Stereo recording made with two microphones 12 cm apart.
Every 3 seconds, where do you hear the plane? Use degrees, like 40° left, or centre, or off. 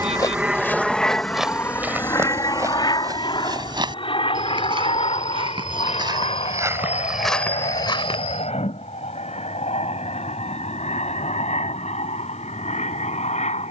10° left, 40° left, 50° left, 60° left, 60° left.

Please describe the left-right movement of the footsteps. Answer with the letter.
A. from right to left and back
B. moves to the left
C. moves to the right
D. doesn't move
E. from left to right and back
E.